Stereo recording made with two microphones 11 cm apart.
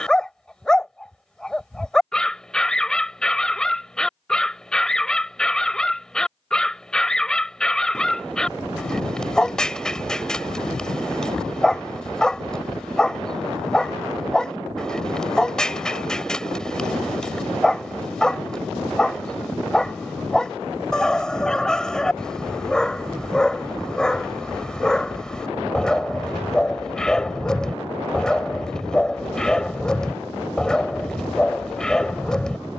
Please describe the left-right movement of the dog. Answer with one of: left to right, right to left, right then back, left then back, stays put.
stays put.